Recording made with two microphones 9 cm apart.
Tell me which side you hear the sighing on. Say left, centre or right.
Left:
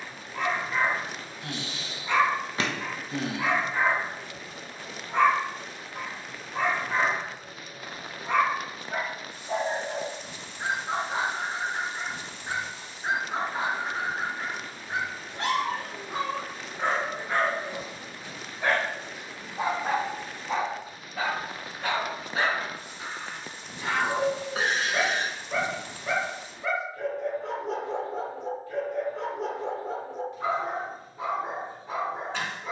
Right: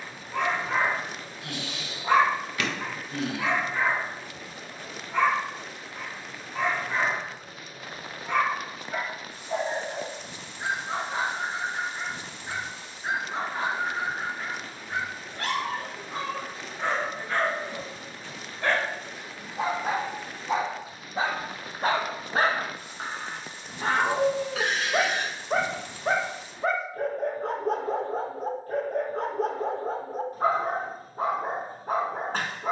left.